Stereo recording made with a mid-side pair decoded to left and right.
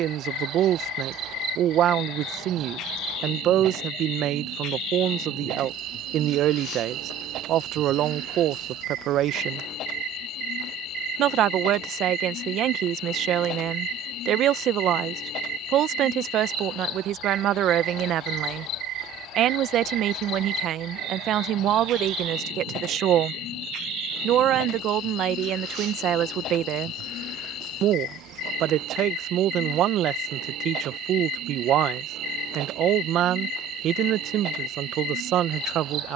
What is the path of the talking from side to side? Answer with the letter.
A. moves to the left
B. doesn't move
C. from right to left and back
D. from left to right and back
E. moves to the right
B.